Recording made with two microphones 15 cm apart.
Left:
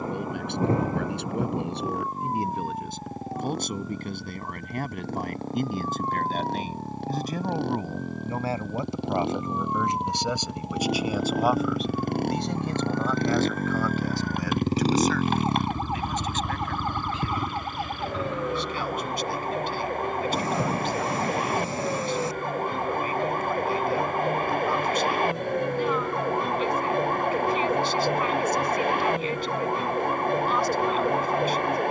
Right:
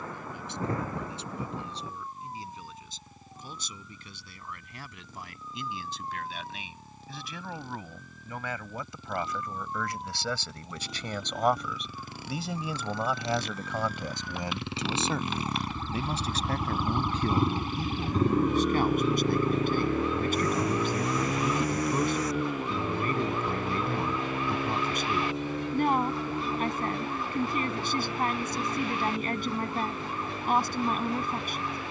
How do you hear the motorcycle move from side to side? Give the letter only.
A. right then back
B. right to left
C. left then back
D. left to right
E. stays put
D.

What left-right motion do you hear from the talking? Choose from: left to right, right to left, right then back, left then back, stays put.
left to right.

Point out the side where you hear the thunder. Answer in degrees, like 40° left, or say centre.
30° left.